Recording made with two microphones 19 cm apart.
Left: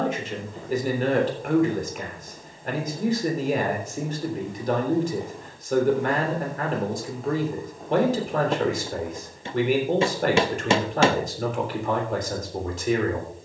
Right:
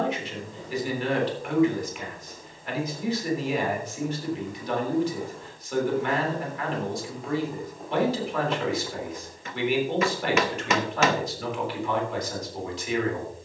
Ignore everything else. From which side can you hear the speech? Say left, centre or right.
left.